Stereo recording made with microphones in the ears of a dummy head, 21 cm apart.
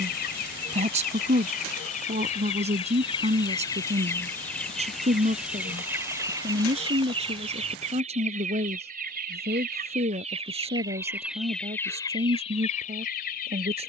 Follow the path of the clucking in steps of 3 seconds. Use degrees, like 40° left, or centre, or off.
40° left, 10° left, 30° right, 20° right, 30° left.